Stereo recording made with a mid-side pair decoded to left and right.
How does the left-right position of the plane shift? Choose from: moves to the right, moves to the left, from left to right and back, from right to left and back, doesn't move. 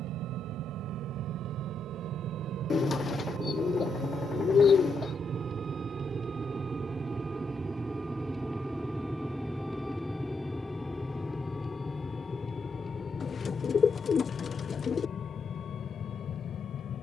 moves to the left.